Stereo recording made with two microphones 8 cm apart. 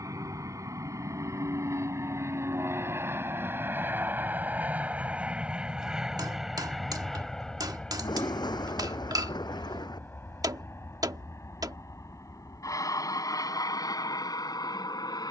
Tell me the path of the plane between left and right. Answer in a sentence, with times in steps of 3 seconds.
In this clip you hear the plane on the right from 0 s, in the centre from 6 s and on the left from 9 s.